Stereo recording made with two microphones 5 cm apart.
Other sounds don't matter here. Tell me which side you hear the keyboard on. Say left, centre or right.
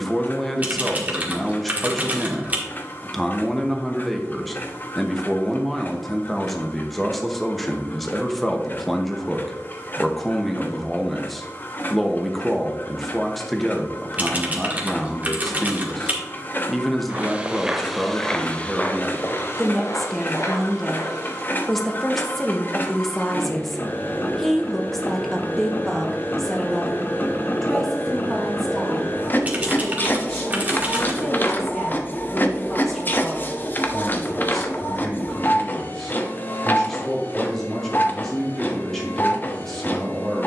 right.